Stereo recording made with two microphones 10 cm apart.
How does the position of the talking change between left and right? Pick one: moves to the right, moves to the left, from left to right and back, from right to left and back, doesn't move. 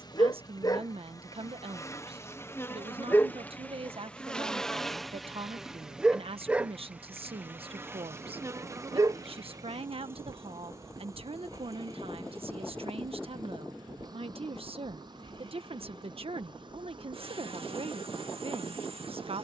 doesn't move.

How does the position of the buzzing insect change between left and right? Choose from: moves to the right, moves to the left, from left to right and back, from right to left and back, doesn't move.
moves to the right.